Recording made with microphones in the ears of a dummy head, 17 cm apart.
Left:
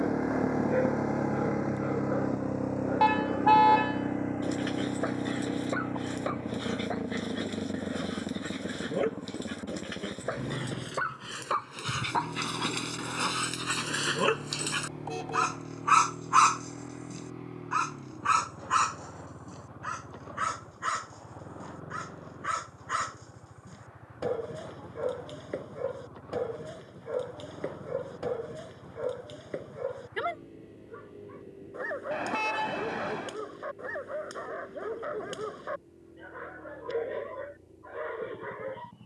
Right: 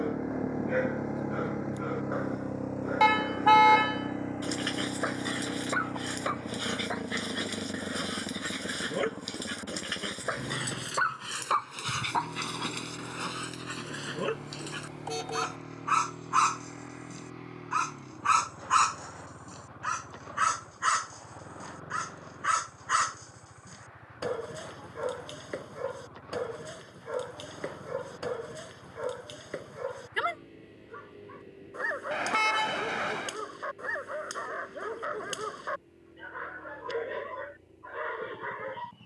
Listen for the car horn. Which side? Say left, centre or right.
right.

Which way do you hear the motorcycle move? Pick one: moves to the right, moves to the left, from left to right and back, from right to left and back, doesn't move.
moves to the right.